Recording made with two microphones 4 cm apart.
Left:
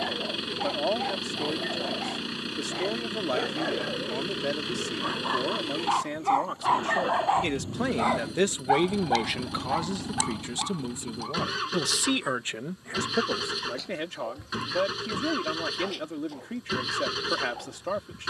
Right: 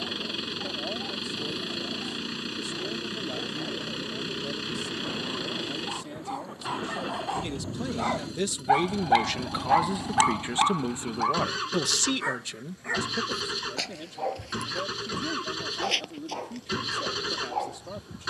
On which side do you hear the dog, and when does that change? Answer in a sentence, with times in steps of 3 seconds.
You can hear the dog on the left from 0 s and on the right from 9 s.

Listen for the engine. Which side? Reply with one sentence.
You can hear the engine in the centre.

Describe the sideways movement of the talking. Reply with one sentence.
In this clip you hear the talking move from left to right and back again.